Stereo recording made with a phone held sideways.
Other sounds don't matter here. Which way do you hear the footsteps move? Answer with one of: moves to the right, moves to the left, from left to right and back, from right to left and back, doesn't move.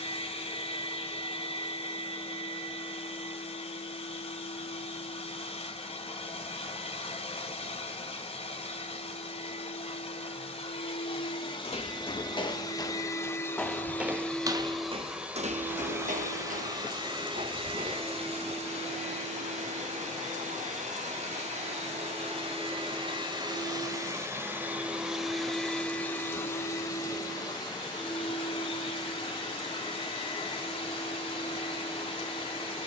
moves to the right.